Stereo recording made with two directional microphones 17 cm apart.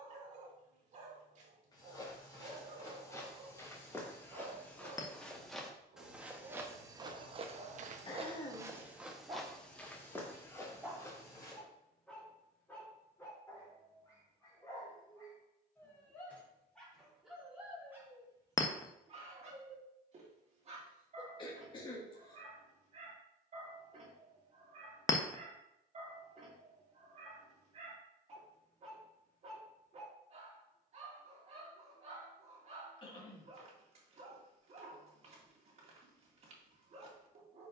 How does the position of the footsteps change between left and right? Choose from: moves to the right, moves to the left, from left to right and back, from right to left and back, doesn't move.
from left to right and back.